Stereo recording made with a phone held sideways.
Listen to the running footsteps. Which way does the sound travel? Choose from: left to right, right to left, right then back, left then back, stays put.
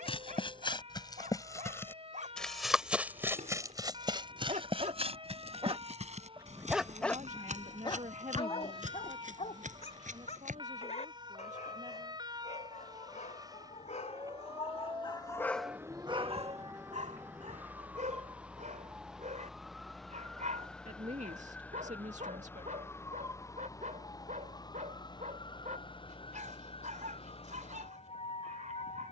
left to right.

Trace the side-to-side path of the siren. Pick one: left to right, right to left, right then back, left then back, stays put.
right to left.